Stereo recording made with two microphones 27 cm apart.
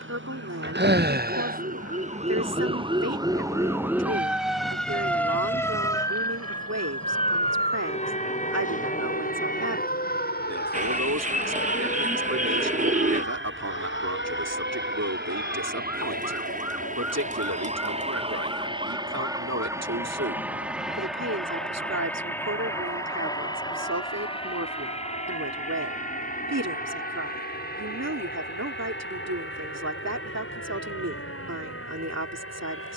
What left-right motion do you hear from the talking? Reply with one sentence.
You can hear the talking stay put.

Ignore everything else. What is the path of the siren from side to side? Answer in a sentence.
In this clip you hear the siren move from right to left.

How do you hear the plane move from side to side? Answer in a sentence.
You can hear the plane move to the left.